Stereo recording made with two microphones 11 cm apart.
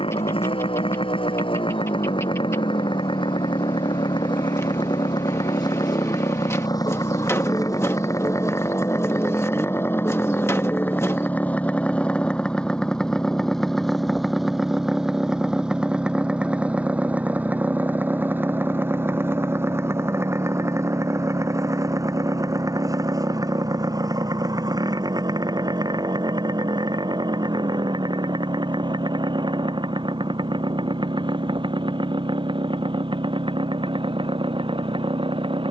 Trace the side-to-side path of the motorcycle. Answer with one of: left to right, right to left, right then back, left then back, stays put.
left to right.